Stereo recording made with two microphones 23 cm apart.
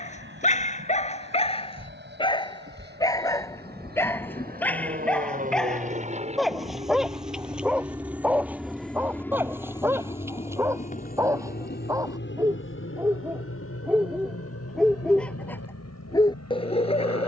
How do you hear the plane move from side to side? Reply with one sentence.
You can hear the plane move to the left.